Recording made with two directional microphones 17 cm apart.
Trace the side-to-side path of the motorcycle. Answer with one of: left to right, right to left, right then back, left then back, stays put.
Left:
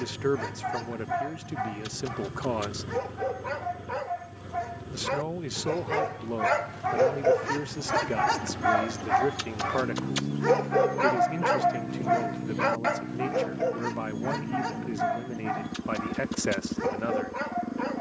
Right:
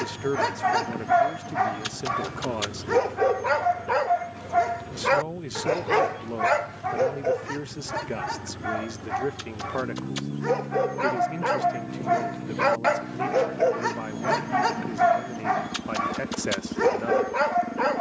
stays put.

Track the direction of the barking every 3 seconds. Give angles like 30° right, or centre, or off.
50° right, 50° right, 10° left, 10° left, 30° right, 50° right.